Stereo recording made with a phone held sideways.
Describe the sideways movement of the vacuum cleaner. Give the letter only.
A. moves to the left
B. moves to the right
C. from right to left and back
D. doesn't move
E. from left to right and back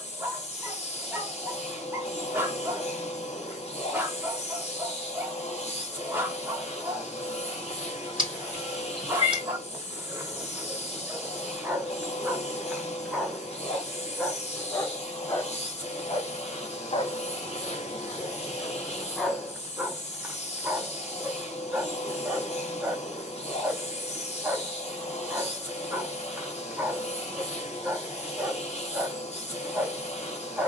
D.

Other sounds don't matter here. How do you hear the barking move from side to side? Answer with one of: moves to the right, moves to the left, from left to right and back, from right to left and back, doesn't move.
from right to left and back.